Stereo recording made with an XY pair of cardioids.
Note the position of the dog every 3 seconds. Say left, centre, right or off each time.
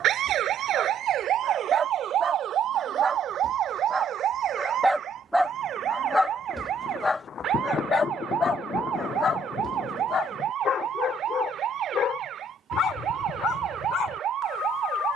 right, centre, left, left, left.